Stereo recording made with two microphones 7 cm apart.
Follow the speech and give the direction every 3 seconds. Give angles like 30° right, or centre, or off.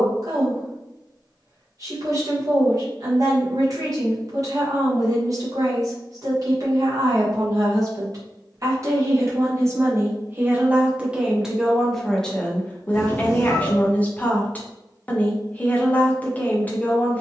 50° right, 50° right, 50° right, 20° right, 20° left, 20° left.